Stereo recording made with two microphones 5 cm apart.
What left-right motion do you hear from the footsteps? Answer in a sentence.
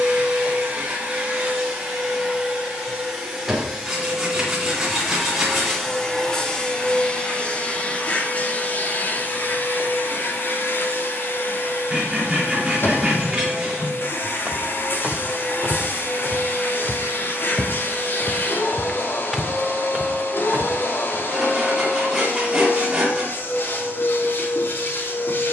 You can hear the footsteps go left and come back.